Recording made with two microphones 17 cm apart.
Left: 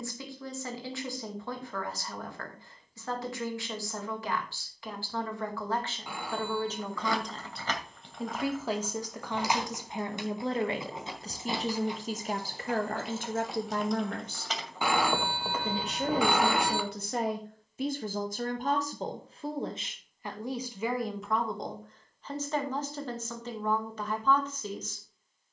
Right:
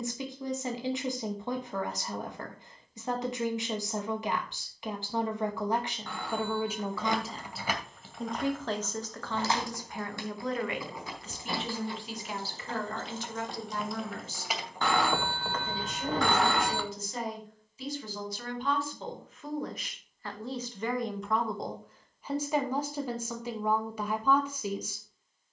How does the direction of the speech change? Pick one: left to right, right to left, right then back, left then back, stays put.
left then back.